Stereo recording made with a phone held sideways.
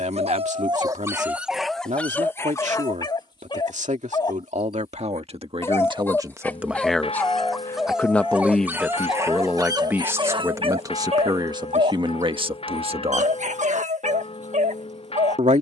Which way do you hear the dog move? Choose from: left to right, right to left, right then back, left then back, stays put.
left then back.